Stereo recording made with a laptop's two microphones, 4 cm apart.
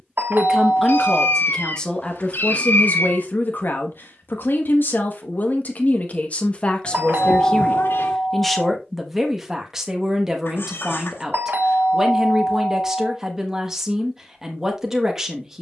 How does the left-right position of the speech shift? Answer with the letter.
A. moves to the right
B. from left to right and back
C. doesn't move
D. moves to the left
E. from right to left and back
E.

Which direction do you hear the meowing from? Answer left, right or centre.
left.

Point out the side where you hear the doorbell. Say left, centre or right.
right.